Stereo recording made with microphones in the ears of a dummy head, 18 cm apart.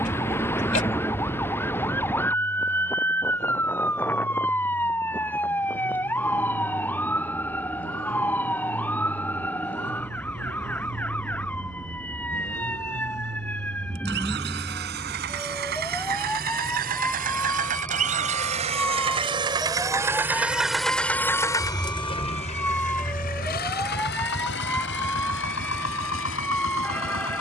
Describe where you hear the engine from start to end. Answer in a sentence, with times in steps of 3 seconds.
In this clip you hear the engine on the right from 0 s and on the left from 21 s.